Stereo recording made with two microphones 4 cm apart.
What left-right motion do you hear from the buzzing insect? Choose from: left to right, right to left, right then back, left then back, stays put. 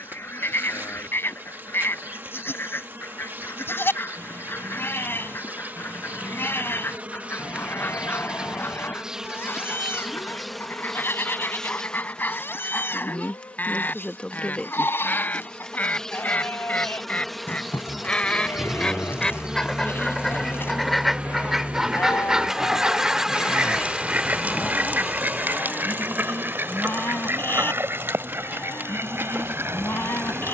left then back.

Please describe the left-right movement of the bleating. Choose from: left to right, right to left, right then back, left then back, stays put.
stays put.